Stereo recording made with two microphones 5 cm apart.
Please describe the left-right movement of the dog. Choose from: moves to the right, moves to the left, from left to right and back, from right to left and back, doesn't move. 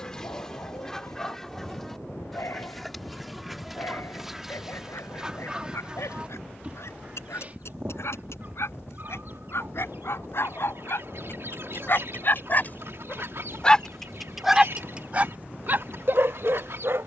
moves to the right.